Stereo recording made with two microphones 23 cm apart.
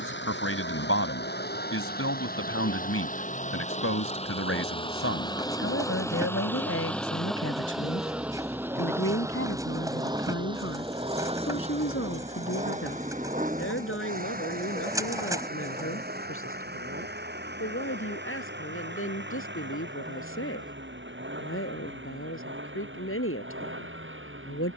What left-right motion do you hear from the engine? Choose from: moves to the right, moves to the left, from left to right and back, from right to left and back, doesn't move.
moves to the right.